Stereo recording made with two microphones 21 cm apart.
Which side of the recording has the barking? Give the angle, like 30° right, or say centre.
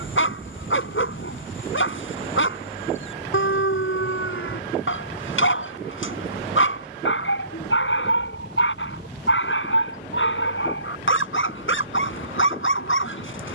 80° left.